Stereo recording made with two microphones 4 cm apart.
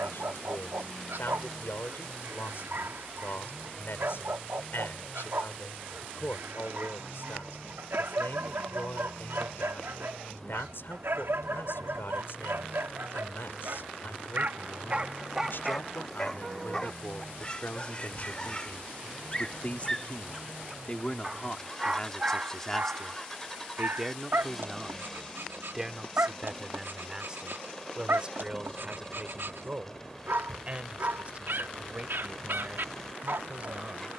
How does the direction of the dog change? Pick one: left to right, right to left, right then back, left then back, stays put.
left then back.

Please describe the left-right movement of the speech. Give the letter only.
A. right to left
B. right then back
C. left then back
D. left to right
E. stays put
D.